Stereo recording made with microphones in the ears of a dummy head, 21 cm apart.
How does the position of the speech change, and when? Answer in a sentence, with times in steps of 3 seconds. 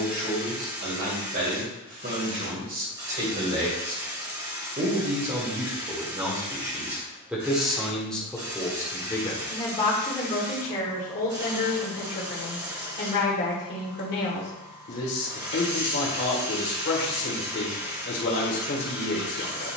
In this clip you hear the speech on the right from 0 s, in the centre from 6 s and on the left from 9 s.